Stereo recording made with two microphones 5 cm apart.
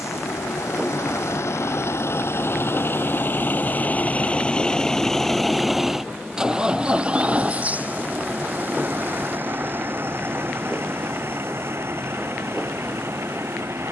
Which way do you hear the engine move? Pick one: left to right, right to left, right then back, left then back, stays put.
left to right.